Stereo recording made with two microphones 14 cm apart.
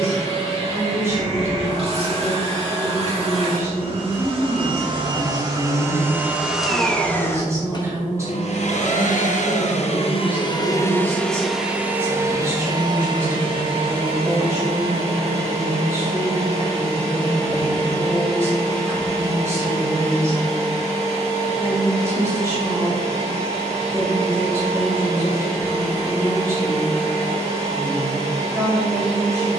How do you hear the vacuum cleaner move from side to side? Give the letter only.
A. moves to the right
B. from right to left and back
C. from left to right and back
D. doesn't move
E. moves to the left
B.